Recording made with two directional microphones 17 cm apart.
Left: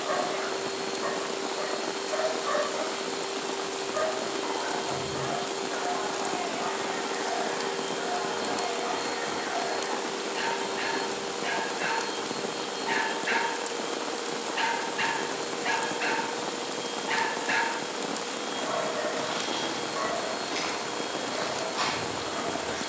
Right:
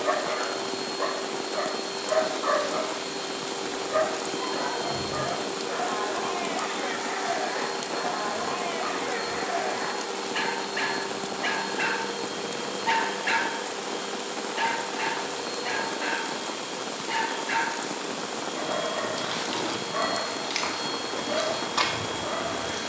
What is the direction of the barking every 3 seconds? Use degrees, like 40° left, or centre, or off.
60° right, 60° right, 60° right, 60° right, 20° right, 30° left, 40° right, 50° right.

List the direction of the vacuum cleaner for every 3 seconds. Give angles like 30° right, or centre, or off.
30° right, 30° right, 20° right, 10° left, centre, 20° right, 30° right, 30° right.